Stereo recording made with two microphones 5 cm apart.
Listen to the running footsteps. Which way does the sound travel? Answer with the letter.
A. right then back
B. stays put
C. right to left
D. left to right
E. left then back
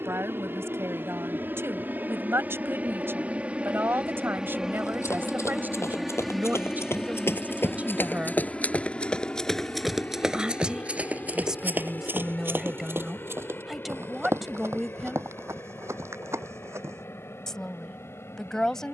D.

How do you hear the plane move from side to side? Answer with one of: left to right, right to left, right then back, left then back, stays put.
right to left.